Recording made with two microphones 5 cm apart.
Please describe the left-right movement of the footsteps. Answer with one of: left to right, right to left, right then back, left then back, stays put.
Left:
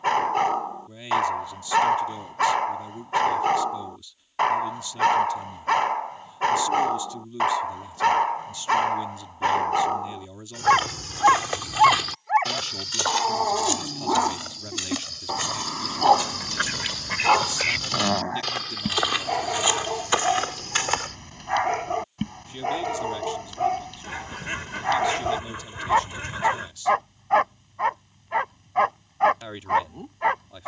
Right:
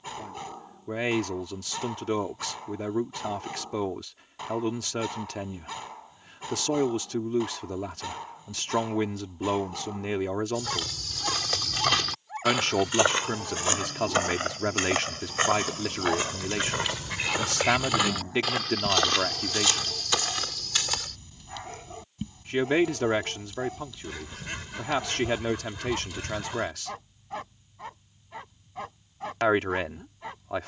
right then back.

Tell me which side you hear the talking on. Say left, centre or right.
right.